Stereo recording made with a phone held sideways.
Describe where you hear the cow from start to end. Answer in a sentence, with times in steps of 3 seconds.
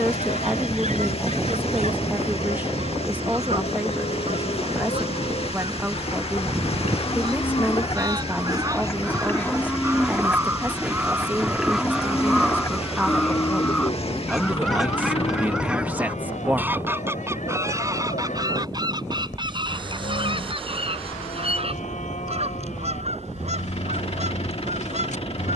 In this clip you hear the cow on the left from 0 s, in the centre from 9 s and on the left from 12 s.